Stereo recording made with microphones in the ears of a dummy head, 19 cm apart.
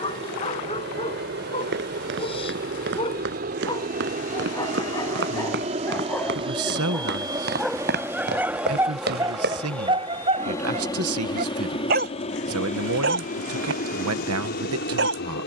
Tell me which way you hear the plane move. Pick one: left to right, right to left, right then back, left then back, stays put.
right to left.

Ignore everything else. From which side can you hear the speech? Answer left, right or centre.
right.